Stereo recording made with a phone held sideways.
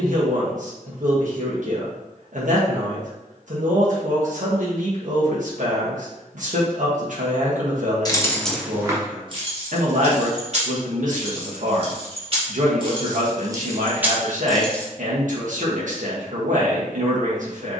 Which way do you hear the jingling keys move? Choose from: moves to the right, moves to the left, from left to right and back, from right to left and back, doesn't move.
from left to right and back.